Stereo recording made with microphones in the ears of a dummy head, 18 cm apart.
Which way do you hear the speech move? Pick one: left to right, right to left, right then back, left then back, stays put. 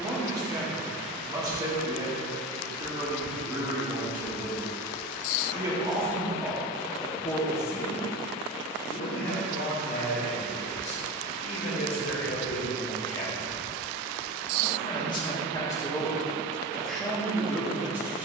left then back.